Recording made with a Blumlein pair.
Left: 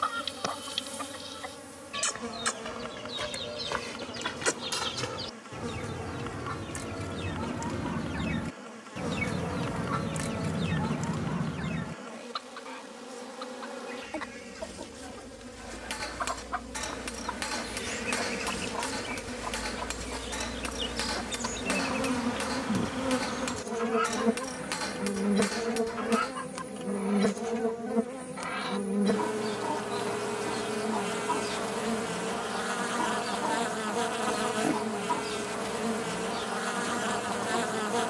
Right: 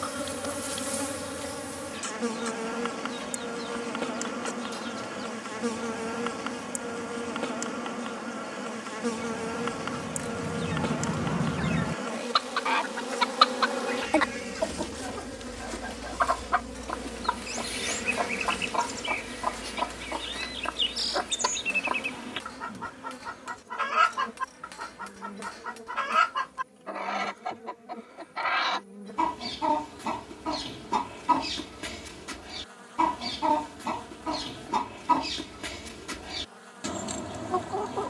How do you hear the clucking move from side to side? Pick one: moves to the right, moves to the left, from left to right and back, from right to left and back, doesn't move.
moves to the right.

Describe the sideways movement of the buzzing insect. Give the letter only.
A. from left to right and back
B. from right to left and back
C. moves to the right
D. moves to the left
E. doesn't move
D.